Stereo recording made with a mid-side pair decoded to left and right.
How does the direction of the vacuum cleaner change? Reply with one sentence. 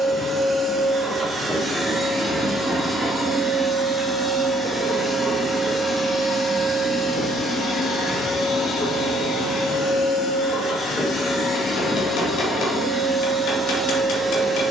You can hear the vacuum cleaner go left and come back.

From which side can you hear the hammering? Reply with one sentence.
You can hear the hammering on the left.